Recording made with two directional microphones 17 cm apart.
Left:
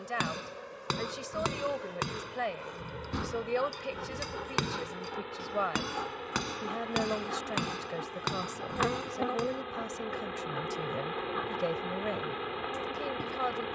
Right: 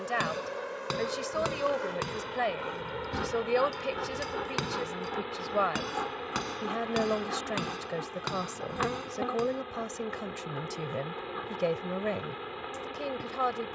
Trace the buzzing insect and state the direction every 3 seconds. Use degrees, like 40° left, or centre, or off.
50° right, 30° right, 10° right, 10° left, 20° left.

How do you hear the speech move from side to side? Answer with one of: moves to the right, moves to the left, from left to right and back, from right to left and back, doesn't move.
doesn't move.